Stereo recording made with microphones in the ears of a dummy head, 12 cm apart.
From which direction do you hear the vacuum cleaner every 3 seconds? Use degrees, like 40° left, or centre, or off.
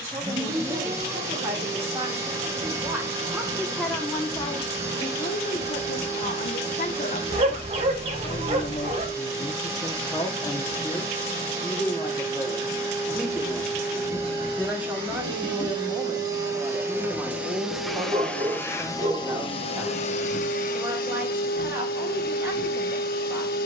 40° right, 40° right, 40° right, 40° right, 40° right, 20° right, 40° left, 70° left.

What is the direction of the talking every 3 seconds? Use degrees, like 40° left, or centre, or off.
20° right, 30° left, 50° left, 20° left, centre, 20° right, 20° right, 20° right.